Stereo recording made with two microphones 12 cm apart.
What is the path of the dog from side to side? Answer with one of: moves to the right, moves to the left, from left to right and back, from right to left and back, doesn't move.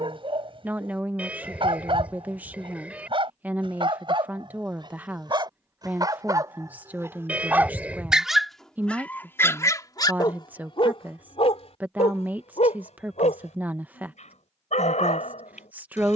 moves to the left.